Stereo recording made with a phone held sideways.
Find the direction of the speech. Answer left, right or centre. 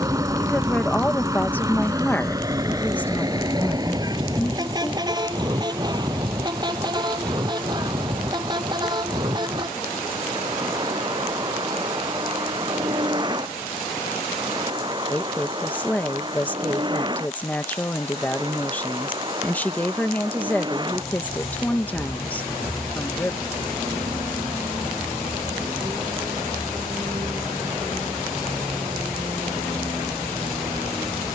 centre.